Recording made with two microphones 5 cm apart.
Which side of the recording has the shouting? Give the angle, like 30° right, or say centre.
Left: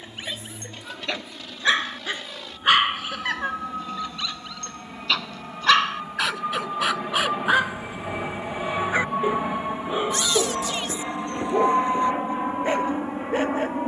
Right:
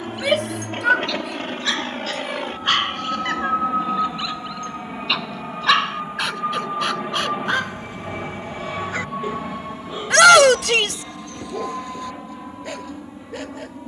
70° right.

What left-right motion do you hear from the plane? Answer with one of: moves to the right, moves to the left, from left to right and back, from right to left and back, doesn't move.
moves to the left.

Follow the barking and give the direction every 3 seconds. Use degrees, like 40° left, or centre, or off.
20° left, centre, 10° left, 30° left, 30° left.